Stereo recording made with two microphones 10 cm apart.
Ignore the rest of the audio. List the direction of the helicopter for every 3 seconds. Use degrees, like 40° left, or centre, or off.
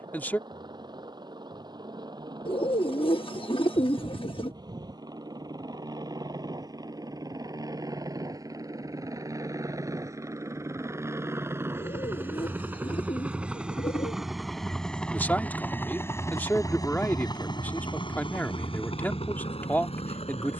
50° right, 50° right, 40° right, 30° right, 10° right, 30° left, 70° left.